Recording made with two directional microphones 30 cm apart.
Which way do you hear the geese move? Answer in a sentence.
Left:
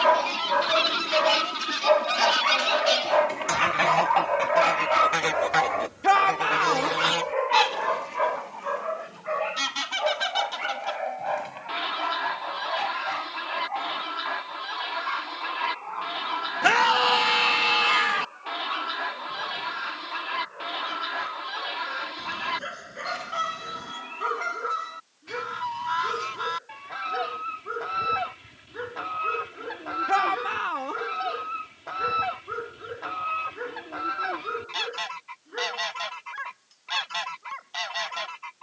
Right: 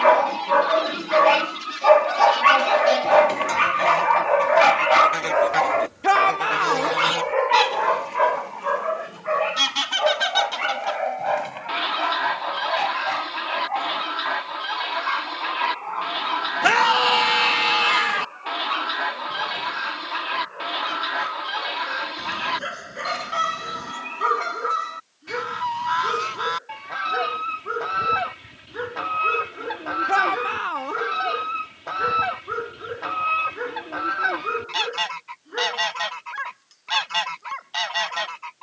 You can hear the geese travel towards the right.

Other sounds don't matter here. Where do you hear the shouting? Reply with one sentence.
You can hear the shouting in the centre.